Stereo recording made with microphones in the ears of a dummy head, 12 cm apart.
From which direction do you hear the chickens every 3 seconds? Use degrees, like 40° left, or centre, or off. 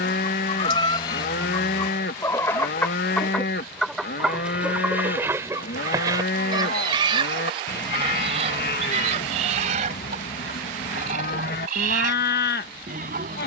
30° left, 10° right, 40° right, 60° right, 70° right.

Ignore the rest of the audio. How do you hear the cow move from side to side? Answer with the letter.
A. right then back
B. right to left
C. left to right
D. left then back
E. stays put
E.